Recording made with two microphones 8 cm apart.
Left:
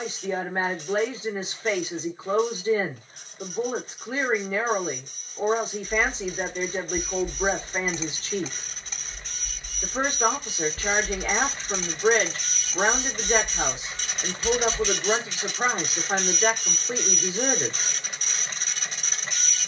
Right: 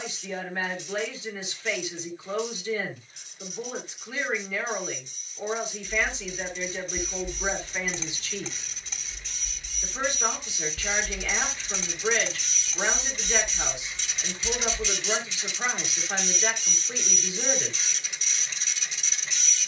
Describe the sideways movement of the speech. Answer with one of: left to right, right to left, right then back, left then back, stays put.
stays put.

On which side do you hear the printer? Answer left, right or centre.
left.